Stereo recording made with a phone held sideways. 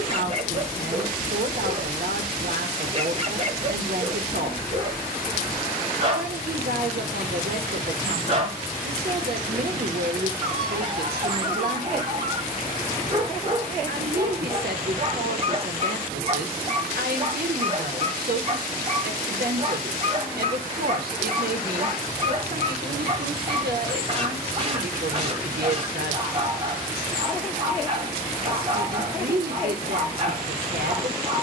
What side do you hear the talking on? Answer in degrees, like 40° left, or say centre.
90° right.